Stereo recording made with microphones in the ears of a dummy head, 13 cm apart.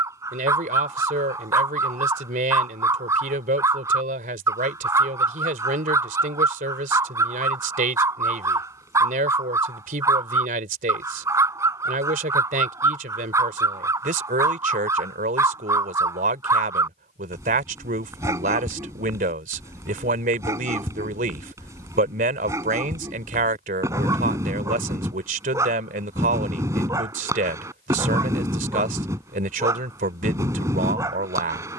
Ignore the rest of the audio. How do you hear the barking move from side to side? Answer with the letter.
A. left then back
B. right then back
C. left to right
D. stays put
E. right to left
D.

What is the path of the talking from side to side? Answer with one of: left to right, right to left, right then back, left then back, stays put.
stays put.